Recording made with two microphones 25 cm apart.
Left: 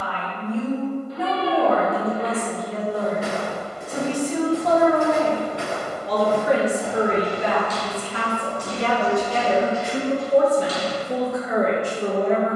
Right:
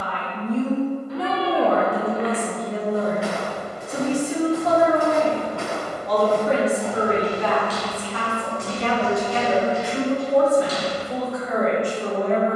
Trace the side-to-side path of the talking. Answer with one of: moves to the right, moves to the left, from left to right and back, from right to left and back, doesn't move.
moves to the left.